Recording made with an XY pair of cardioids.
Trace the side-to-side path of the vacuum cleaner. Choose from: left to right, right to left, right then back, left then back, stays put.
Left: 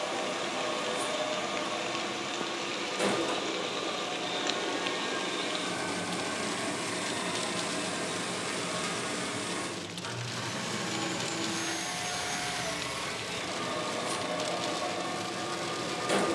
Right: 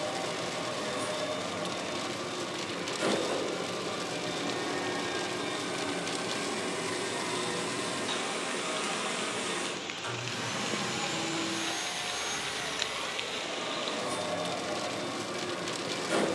right then back.